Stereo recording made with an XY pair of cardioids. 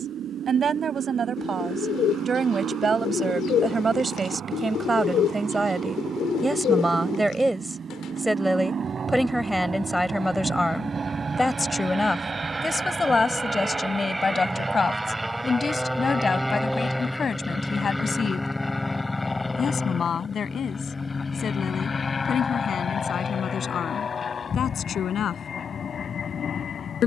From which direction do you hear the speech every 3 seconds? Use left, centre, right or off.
right, right, centre, centre, left, left, left, left, left.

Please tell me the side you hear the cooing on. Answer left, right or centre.
left.